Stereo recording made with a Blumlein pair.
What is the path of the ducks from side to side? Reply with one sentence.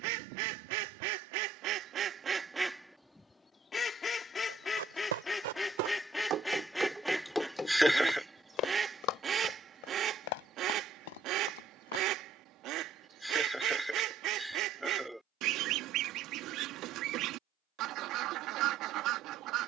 In this clip you hear the ducks go left and come back.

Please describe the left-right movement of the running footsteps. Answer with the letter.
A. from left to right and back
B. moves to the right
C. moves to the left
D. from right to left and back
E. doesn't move
C.